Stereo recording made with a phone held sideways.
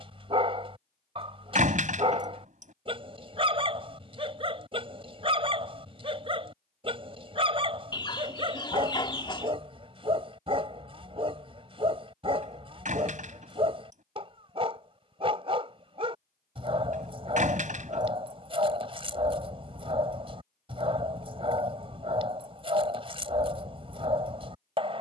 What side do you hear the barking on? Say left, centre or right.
right.